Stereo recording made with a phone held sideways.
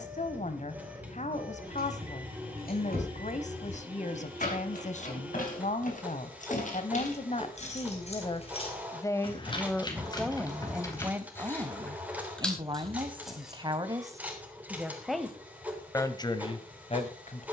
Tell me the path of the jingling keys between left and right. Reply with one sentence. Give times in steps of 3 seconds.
In this clip you hear the jingling keys on the left from 0 s, in the centre from 12 s and not at all from 15 s.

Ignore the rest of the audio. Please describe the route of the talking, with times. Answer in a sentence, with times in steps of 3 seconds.
You can hear the talking on the left from 0 s, in the centre from 9 s, on the right from 12 s and on the left from 15 s.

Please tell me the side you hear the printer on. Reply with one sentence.
You can hear the printer in the centre.